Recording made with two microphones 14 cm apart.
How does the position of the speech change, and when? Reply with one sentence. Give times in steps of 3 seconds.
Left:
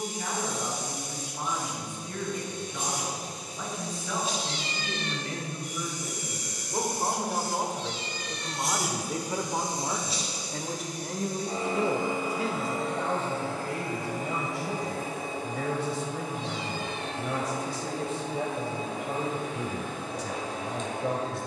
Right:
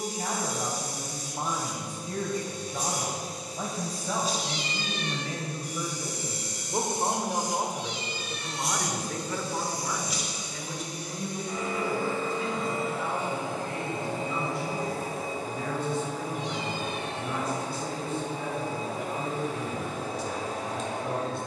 You can hear the speech on the right from 0 s, in the centre from 6 s and on the left from 9 s.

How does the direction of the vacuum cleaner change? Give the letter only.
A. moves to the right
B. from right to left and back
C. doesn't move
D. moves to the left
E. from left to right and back
B.